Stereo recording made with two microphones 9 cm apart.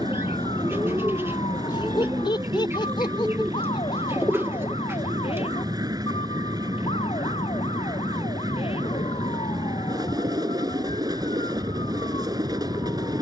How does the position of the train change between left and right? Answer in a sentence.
In this clip you hear the train stay in one place.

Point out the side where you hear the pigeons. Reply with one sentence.
You can hear the pigeons on the right.